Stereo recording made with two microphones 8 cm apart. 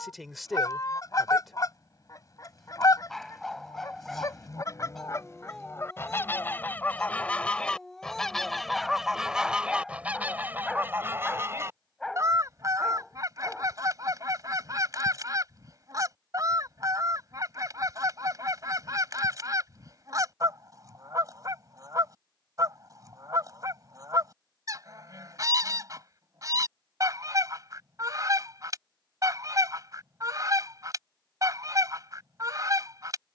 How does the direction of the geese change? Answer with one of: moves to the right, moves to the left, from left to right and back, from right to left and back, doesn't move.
moves to the right.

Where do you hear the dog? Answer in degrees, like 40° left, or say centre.
centre.